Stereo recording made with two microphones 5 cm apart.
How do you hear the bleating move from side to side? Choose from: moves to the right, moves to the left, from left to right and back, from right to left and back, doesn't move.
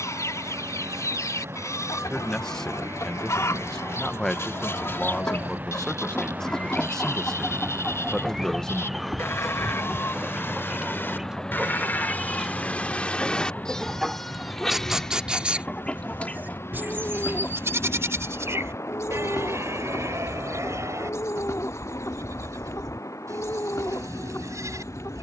moves to the right.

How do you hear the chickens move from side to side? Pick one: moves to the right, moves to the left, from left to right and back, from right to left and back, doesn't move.
from left to right and back.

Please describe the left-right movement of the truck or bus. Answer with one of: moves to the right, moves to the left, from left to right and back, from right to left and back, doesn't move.
moves to the left.